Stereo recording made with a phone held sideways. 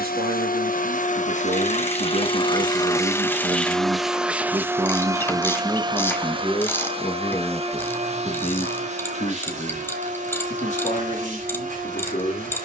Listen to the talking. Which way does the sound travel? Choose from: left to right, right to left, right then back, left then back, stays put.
right to left.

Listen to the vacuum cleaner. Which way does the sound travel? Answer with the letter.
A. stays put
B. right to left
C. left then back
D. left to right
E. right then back
D.